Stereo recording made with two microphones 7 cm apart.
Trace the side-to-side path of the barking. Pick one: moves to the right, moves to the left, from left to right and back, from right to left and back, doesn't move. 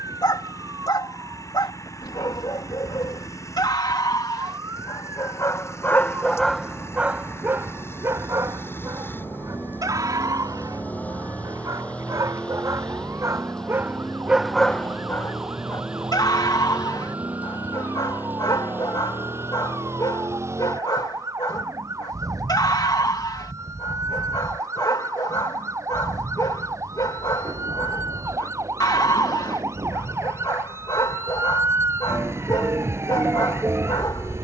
from left to right and back.